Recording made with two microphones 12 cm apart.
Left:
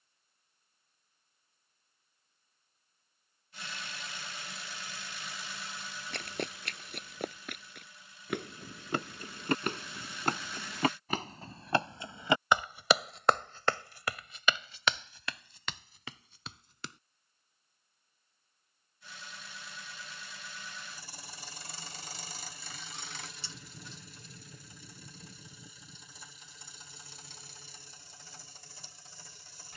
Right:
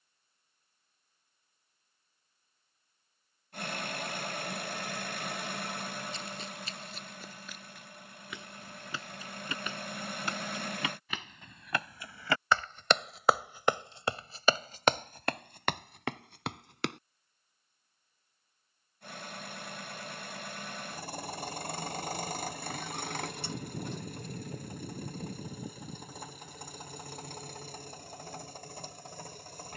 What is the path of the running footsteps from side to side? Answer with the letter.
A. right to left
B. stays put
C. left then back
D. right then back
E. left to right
E.